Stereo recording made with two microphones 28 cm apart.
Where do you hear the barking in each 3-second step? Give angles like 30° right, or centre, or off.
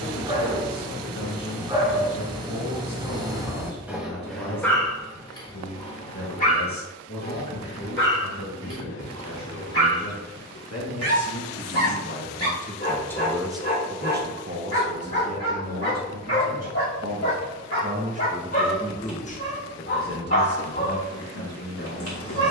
20° right, centre, 40° left, 50° left, 50° left, 50° left, 50° left, 50° left.